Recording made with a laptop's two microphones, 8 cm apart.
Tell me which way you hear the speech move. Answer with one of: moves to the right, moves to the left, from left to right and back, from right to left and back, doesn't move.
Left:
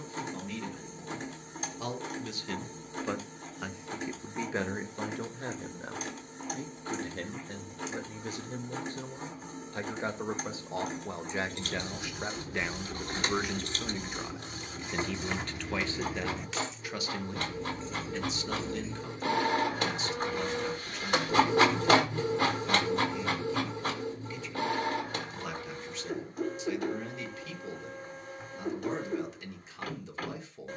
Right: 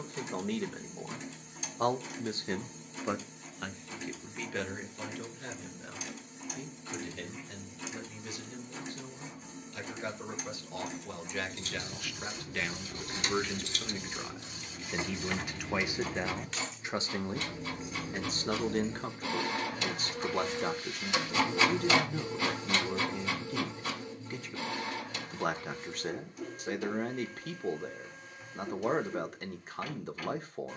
from right to left and back.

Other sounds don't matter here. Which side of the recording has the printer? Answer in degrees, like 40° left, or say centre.
50° left.